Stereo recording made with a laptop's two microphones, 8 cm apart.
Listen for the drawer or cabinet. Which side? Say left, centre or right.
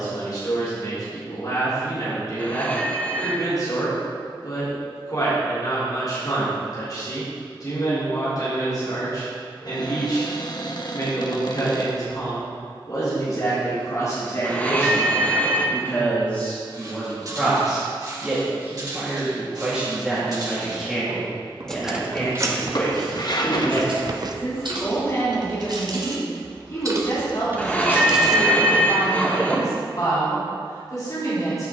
left.